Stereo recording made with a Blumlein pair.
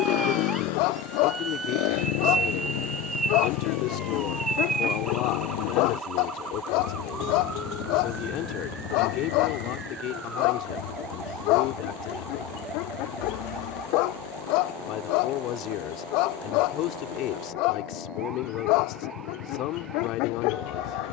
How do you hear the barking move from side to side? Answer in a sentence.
In this clip you hear the barking stay put.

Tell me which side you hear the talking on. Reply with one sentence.
You can hear the talking on the left.